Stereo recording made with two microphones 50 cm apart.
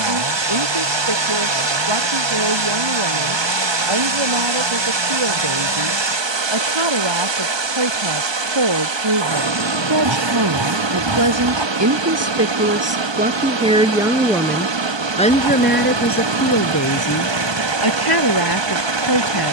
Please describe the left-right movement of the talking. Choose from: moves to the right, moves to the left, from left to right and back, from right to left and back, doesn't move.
moves to the left.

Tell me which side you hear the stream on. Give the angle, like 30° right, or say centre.
60° right.